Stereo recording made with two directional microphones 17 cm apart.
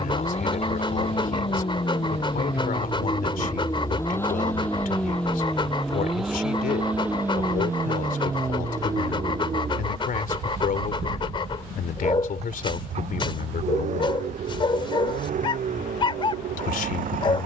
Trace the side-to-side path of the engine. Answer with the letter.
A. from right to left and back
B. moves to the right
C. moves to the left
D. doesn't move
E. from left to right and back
B.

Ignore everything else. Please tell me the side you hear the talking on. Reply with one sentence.
In this clip you hear the talking on the left.